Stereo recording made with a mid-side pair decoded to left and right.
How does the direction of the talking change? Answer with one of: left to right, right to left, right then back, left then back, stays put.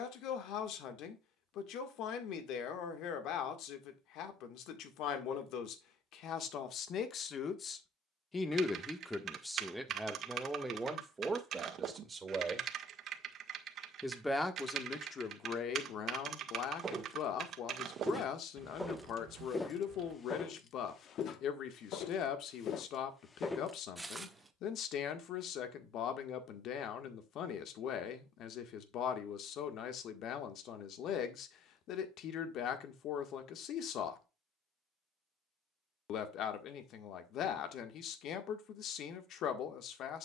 right then back.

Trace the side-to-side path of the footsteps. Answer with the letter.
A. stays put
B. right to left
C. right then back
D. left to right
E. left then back
E.